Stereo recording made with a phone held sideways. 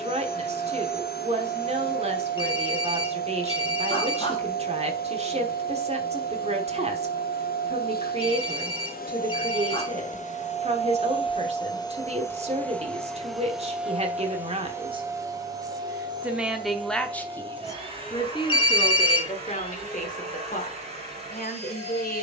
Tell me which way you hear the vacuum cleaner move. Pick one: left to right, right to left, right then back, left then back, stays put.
left to right.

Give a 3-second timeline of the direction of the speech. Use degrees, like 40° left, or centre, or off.
40° right, 40° right, 40° right, 40° right, 40° right, centre, 40° left, 60° left.